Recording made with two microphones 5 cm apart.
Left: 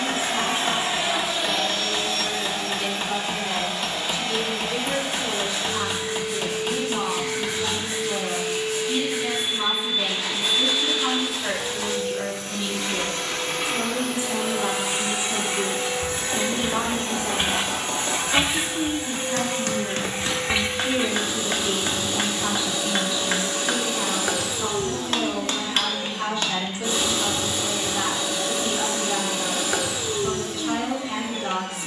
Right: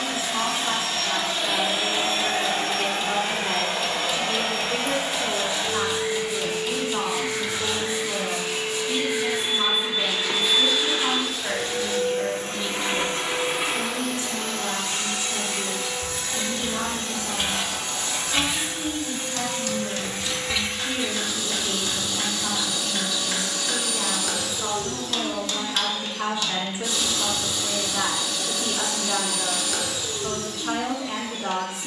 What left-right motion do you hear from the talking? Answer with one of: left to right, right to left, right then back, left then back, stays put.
left then back.